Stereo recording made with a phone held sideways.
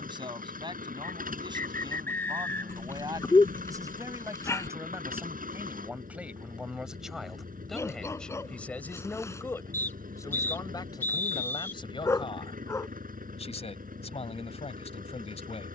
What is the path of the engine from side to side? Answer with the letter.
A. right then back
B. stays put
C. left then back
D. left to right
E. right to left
B.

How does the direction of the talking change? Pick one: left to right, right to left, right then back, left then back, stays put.
right to left.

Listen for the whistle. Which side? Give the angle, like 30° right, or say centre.
20° left.